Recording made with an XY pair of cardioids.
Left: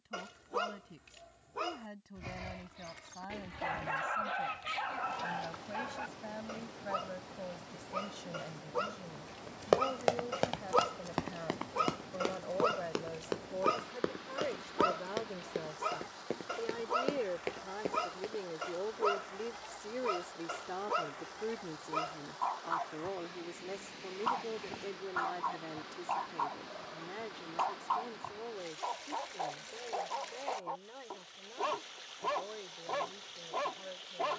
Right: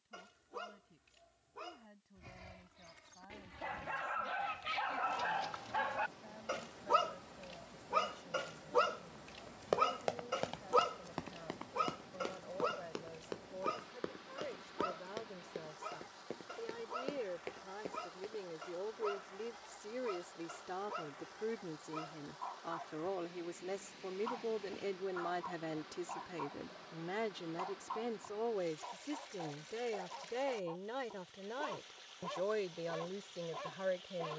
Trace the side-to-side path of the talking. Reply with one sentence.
You can hear the talking move from left to right.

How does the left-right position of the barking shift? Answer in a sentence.
You can hear the barking go right and come back.